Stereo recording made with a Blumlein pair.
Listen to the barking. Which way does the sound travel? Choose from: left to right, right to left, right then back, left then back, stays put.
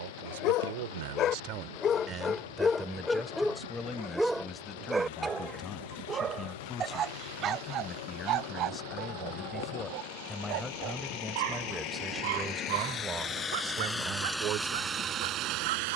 left to right.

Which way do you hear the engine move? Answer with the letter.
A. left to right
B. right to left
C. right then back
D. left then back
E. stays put
A.